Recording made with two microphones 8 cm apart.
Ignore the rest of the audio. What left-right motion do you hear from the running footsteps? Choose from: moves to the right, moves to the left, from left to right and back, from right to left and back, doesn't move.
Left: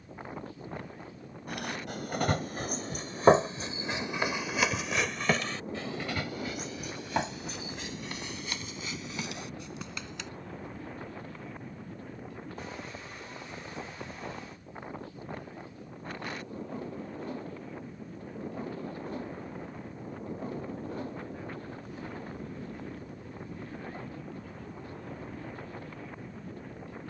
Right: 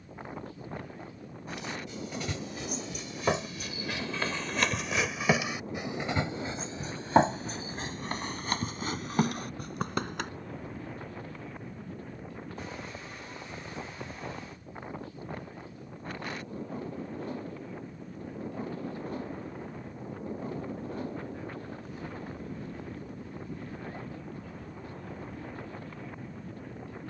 moves to the right.